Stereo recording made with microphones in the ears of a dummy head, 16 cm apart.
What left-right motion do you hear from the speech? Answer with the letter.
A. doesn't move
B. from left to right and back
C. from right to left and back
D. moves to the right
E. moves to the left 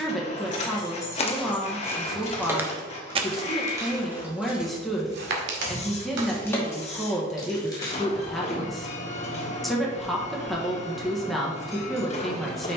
A.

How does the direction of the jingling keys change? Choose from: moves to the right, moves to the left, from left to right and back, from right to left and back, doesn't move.
from left to right and back.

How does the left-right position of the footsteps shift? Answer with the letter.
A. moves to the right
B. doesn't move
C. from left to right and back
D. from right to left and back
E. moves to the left
A.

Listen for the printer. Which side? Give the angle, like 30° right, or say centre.
40° left.